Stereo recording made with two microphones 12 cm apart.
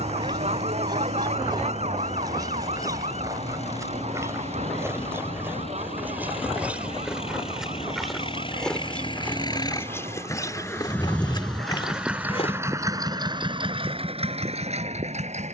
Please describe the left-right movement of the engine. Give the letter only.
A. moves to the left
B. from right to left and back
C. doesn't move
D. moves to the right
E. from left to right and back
D.